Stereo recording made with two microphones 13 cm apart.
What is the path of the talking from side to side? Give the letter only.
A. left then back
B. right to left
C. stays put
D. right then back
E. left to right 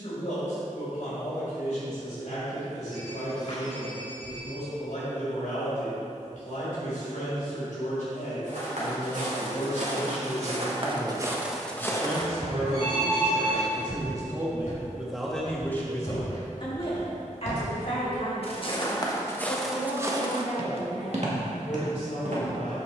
D.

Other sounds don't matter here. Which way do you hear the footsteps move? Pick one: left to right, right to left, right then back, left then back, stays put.
left then back.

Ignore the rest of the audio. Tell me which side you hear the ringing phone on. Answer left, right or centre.
left.